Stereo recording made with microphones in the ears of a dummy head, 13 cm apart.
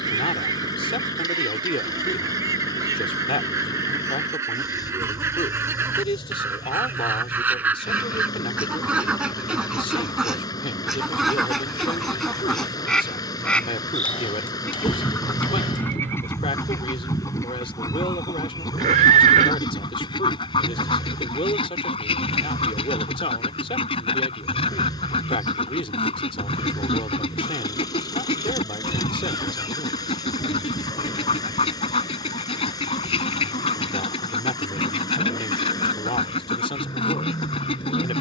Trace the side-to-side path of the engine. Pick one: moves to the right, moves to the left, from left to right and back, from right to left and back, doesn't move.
doesn't move.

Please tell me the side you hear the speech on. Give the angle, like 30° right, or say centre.
40° left.